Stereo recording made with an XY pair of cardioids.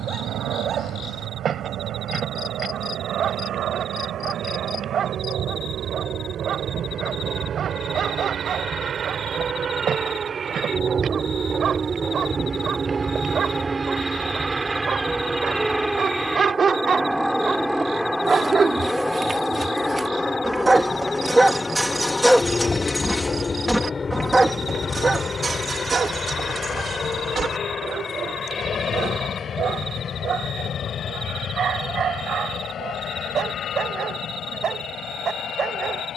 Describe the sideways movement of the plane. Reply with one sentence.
In this clip you hear the plane go from the right side to the left.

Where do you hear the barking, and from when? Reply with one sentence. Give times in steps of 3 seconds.
In this clip you hear the barking on the right from 0 s, in the centre from 21 s and on the right from 24 s.